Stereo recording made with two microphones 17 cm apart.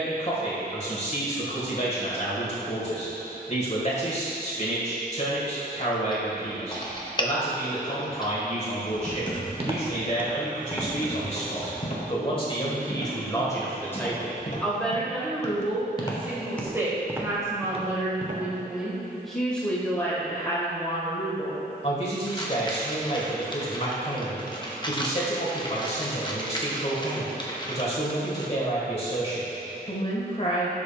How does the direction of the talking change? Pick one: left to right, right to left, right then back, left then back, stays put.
right then back.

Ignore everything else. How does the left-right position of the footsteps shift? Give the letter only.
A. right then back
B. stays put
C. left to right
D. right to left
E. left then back
E.